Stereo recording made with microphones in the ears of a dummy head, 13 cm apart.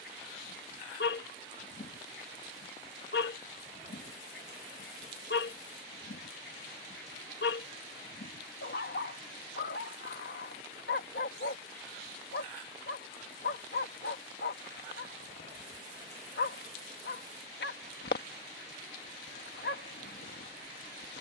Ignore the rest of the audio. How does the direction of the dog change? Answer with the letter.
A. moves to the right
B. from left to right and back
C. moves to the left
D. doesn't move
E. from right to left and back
D.